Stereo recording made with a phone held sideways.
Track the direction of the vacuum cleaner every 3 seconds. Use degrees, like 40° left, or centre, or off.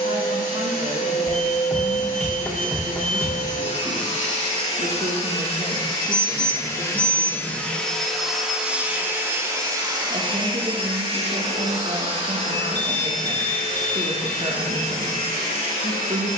60° left, 40° left, 10° left, 30° right, 60° right, 60° right.